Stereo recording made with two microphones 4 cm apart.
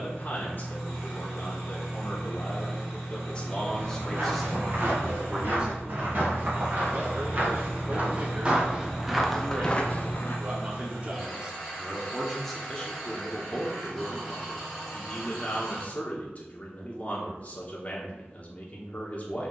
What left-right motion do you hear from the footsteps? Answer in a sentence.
You can hear the footsteps move from right to left.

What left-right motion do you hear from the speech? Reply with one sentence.
You can hear the speech go right and come back.